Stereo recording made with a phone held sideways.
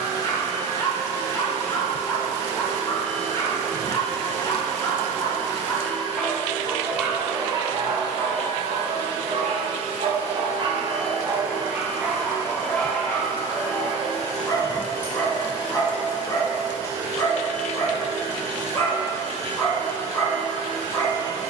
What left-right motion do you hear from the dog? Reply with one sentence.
You can hear the dog move from left to right and back again.